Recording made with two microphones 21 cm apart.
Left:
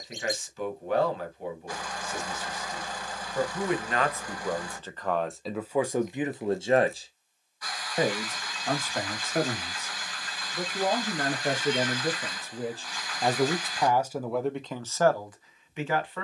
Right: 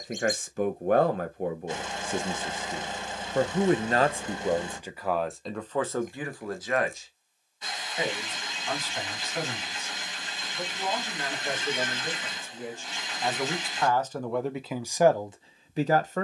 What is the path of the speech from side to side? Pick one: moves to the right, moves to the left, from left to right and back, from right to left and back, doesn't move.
from right to left and back.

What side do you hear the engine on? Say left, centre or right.
right.